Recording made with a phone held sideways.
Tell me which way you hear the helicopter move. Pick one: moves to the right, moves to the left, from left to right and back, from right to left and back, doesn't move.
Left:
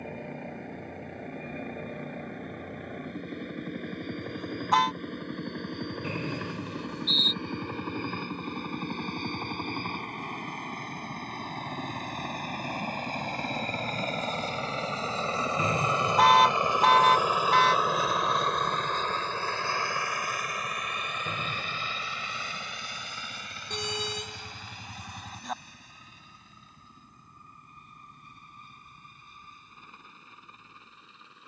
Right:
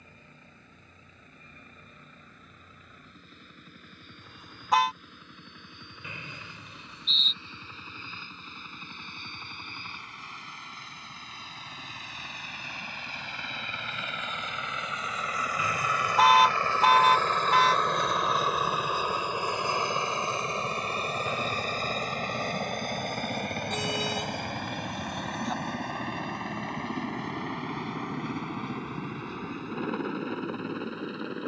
moves to the right.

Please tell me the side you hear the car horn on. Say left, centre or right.
centre.